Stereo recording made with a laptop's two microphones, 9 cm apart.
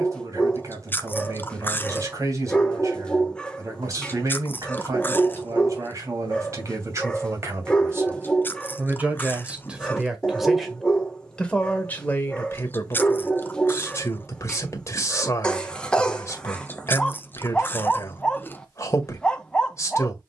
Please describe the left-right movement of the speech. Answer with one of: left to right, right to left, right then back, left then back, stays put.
right to left.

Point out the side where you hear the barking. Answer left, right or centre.
centre.